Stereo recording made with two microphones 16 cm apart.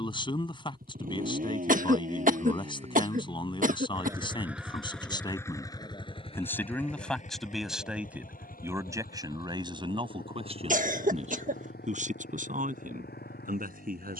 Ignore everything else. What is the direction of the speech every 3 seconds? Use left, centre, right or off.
left, left, centre, right, right.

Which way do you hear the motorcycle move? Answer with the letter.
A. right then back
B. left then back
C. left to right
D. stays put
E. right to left
E.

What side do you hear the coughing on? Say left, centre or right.
right.